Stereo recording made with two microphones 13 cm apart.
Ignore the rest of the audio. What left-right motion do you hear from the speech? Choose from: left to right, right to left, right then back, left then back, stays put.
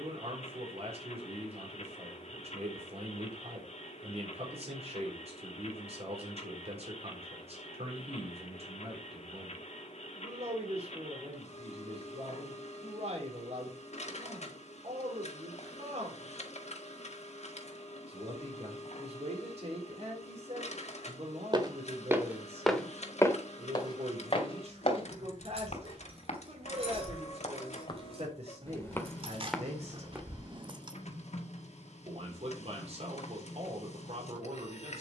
stays put.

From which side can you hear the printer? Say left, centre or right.
left.